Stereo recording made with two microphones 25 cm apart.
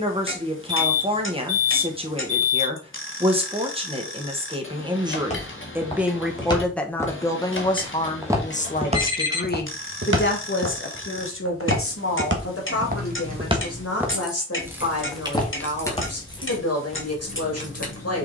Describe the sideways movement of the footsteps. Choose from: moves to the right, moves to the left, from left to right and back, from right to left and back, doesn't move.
from left to right and back.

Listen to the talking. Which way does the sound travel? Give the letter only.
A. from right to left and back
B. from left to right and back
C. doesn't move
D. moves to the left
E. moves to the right
D.